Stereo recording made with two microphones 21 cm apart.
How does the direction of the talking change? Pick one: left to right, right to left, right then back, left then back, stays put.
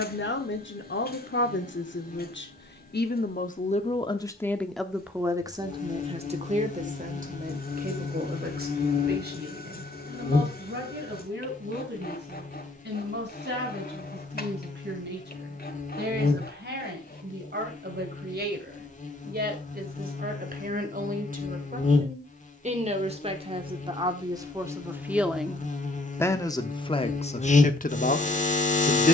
right then back.